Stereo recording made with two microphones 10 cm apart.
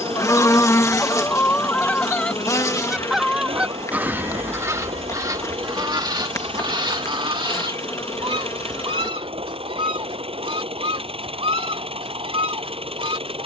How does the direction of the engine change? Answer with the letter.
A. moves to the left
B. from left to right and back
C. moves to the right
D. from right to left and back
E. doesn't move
E.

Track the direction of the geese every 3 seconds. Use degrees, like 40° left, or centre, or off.
20° left, 30° right, 60° right, 70° right, 70° right.